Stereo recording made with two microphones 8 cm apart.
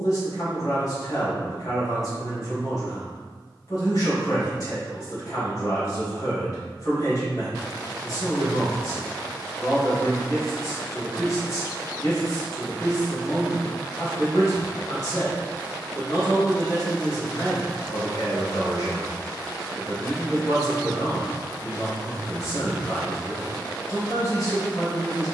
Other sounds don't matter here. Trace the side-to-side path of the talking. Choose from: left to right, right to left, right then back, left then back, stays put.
stays put.